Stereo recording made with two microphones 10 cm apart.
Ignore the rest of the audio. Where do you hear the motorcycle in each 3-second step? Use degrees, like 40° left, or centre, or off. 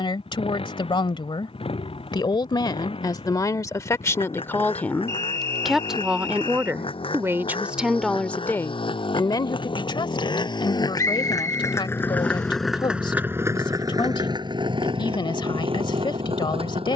80° left, 80° left, 70° left, 50° left, 20° right, 70° right.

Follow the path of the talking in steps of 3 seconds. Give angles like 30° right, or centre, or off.
50° left, 20° left, 10° right, 50° left, 60° left, 60° left.